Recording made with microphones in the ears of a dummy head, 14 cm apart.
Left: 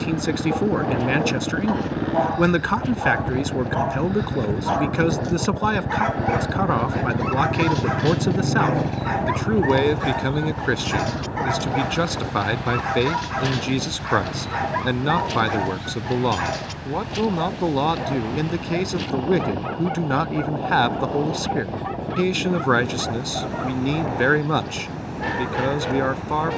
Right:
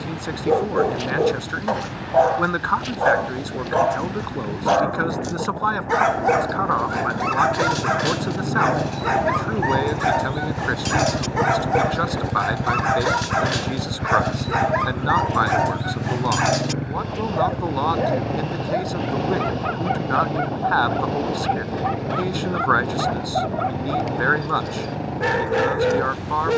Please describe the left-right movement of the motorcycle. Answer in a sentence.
You can hear the motorcycle move to the right.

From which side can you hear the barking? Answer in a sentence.
You can hear the barking on the right.